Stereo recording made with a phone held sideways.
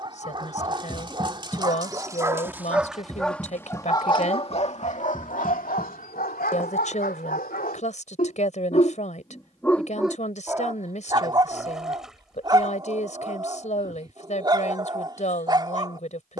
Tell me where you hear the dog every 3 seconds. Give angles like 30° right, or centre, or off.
20° right, 40° left, 70° left, 10° right, 30° right, 30° right.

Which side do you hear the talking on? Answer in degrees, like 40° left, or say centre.
50° left.